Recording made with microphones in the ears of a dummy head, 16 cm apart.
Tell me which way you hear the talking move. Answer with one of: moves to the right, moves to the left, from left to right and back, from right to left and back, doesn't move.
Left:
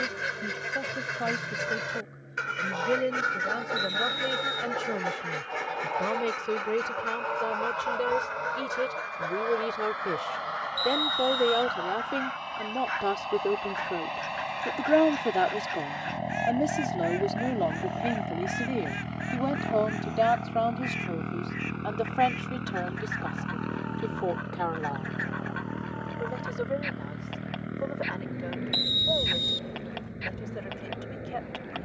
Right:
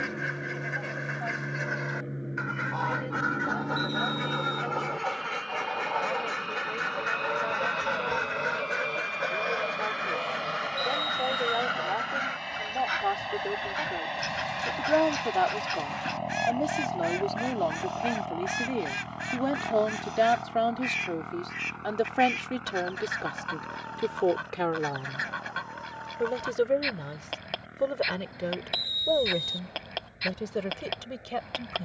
moves to the right.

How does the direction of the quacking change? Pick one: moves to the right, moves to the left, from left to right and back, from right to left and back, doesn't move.
moves to the right.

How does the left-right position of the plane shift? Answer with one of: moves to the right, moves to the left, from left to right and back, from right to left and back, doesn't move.
moves to the left.